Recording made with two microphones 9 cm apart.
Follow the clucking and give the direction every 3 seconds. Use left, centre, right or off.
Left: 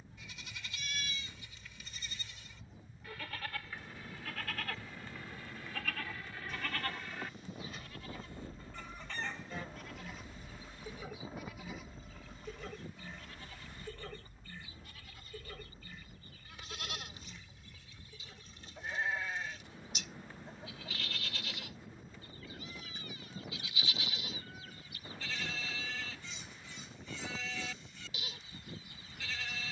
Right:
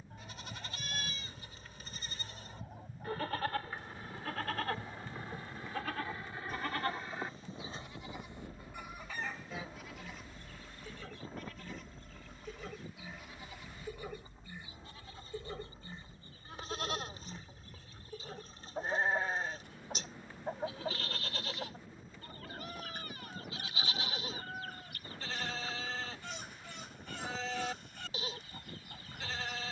right, right, right, centre, centre, right, right, right, right, right.